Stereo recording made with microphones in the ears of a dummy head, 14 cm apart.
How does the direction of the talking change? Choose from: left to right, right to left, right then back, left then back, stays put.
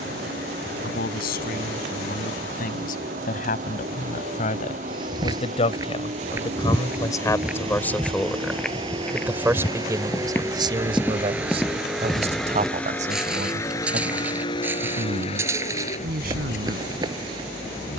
left to right.